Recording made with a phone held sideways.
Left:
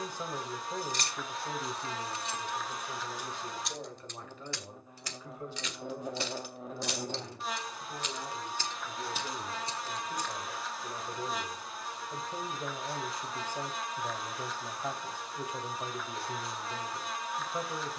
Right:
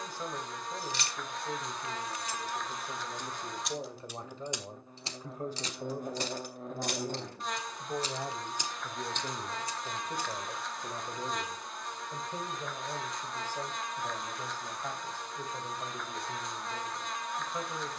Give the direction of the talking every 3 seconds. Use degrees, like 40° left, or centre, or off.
10° left, 30° right, 50° right, 20° right, 10° left, 10° left.